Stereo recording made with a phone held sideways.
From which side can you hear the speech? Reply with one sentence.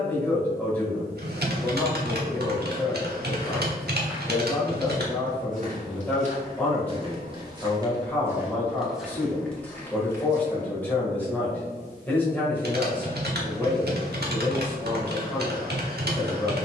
You can hear the speech in the centre.